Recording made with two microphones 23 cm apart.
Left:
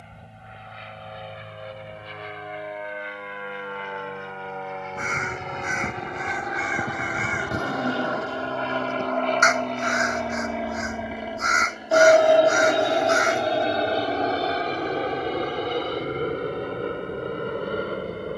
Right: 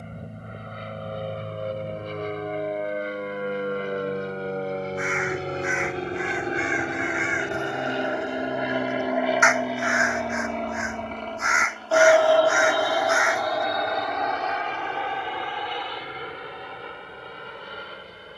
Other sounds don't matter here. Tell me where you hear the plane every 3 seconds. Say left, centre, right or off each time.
right, right, right, centre, left, left.